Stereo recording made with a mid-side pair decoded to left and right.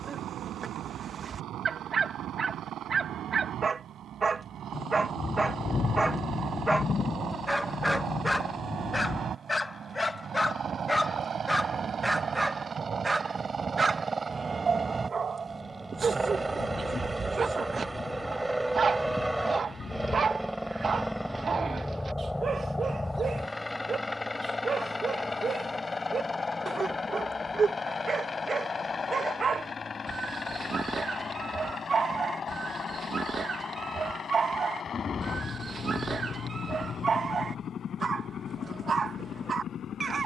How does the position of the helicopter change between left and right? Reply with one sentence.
In this clip you hear the helicopter move to the left.